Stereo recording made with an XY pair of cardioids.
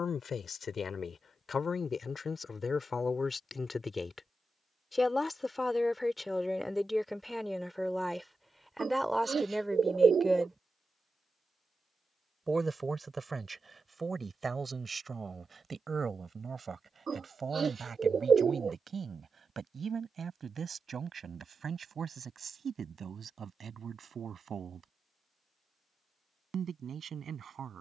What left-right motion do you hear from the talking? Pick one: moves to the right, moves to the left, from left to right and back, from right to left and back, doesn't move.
moves to the right.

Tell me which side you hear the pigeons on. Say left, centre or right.
right.